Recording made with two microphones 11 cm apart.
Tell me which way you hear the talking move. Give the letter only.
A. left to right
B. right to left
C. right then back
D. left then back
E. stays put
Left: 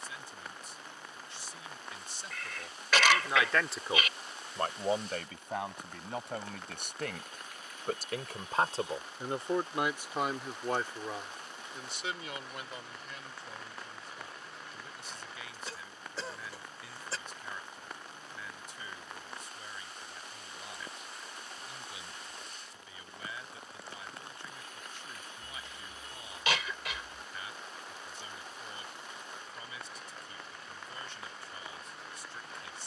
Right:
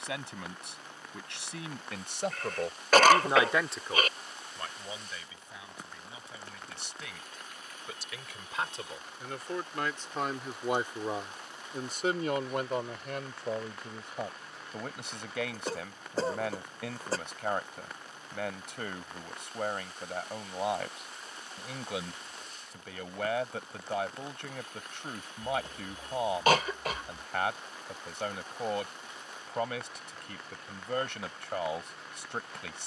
D.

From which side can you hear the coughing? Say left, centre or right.
right.